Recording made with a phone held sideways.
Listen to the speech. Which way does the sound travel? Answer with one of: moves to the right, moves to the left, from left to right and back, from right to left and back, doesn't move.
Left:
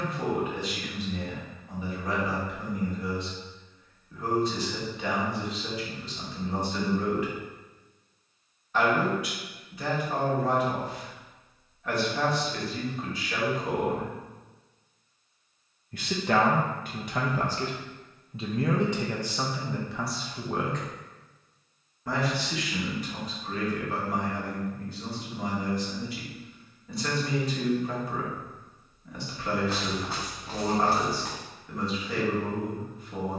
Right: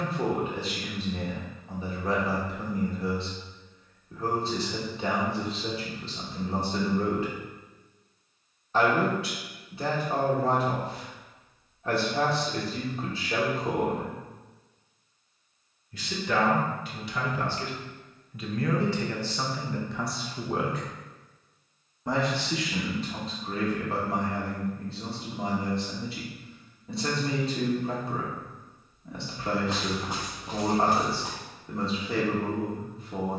from right to left and back.